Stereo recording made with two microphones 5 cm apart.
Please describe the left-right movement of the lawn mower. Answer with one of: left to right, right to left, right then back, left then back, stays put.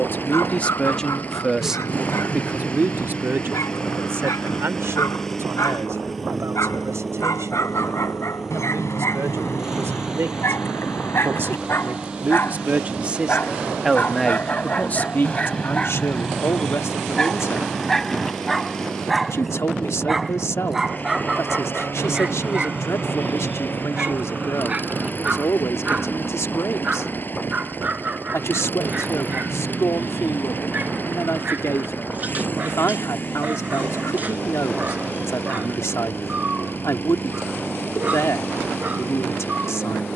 right then back.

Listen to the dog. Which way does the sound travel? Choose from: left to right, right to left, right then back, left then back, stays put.
left to right.